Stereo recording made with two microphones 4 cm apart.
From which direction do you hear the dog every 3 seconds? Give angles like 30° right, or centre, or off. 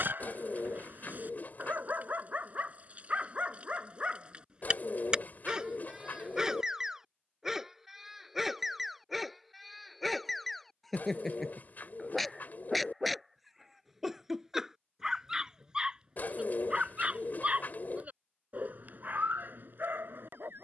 40° right, 30° right, 10° right, centre, centre, 20° right, 50° right.